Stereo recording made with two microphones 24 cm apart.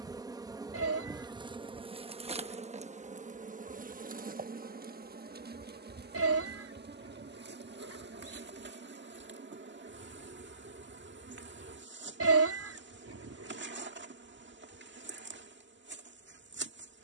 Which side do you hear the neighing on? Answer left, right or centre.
right.